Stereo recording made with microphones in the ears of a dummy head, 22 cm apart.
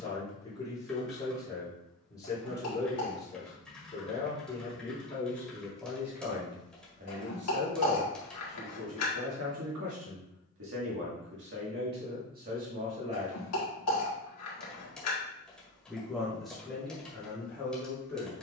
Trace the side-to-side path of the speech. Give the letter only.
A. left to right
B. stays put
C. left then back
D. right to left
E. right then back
E.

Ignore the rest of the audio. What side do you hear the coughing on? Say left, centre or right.
left.